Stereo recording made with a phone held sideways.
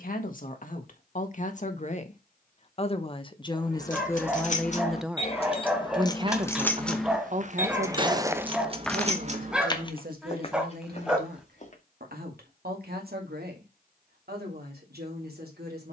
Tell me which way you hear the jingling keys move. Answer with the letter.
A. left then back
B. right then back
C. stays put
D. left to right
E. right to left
D.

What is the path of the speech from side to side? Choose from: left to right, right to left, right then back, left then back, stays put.
left to right.